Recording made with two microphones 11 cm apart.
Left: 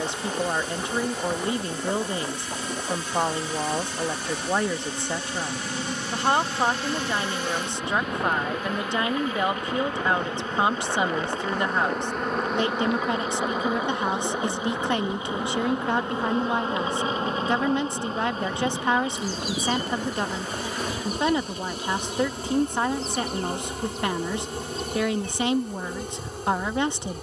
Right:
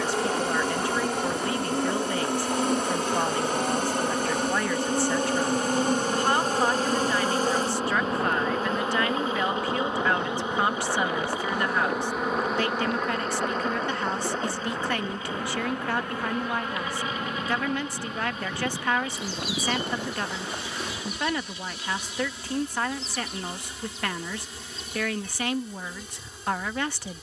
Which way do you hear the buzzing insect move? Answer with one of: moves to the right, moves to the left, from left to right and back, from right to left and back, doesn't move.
moves to the left.